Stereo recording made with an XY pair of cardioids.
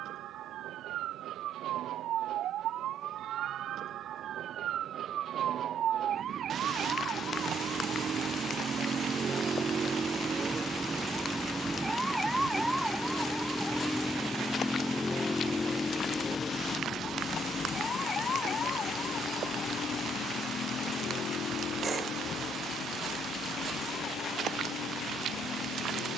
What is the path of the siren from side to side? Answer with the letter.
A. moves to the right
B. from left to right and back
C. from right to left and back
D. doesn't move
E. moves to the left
E.